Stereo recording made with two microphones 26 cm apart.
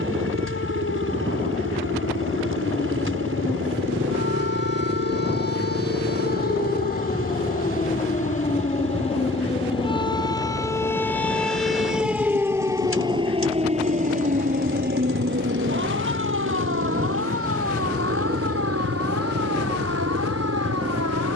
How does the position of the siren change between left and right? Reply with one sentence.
You can hear the siren travel towards the right.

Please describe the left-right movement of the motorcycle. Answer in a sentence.
In this clip you hear the motorcycle stay put.